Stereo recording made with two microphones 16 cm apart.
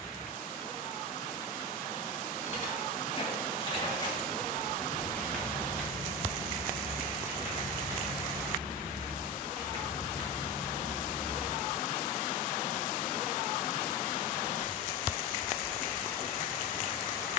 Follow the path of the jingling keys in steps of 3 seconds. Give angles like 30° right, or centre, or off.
50° left, 20° left, 20° right, 30° right, off, off.